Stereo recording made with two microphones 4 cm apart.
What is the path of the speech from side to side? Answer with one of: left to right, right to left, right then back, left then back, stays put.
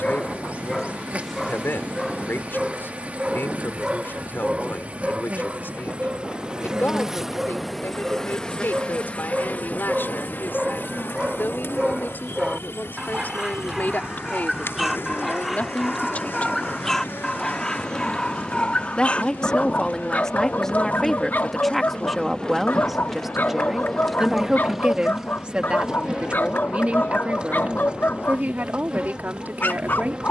left to right.